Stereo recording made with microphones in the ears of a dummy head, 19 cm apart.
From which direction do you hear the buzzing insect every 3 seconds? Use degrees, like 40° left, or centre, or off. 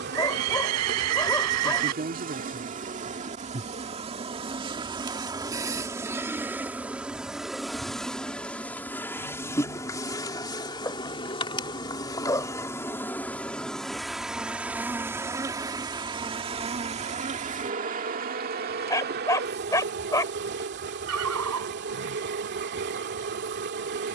50° right, 30° right, centre, 20° left, centre, 30° right, 50° right, 50° right.